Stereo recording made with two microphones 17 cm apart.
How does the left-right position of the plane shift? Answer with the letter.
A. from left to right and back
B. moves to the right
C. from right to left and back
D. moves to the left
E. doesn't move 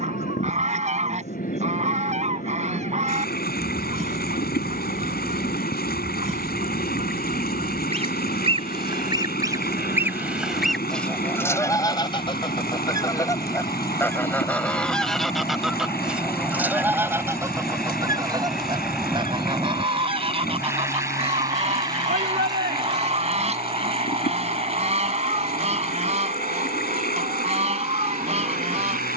B.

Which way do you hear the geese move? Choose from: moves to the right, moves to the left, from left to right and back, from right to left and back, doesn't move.
from right to left and back.